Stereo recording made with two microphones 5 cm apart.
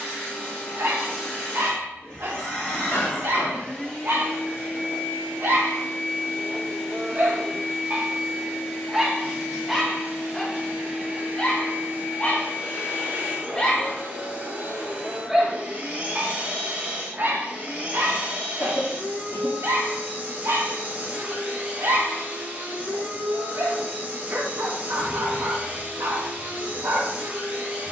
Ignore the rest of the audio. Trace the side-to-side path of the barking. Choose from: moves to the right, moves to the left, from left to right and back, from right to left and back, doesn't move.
from right to left and back.